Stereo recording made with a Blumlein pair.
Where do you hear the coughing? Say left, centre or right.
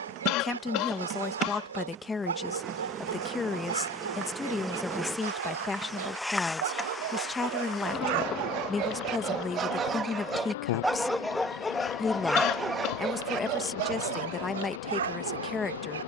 left.